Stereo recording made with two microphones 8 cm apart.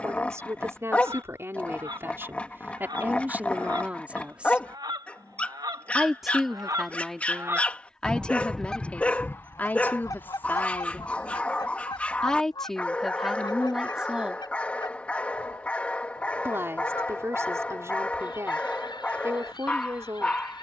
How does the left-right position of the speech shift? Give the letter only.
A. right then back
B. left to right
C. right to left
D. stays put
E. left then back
E.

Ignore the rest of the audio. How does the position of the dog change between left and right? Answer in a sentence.
In this clip you hear the dog stay in one place.